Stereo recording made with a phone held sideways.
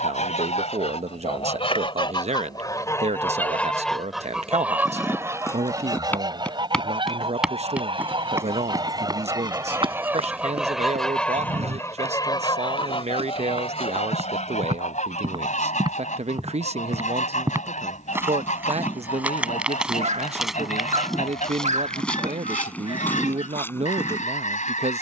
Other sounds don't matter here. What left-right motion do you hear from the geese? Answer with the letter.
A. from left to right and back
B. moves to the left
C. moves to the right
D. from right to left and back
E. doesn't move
A.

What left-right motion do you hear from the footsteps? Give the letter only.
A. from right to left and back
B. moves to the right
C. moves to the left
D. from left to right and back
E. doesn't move
D.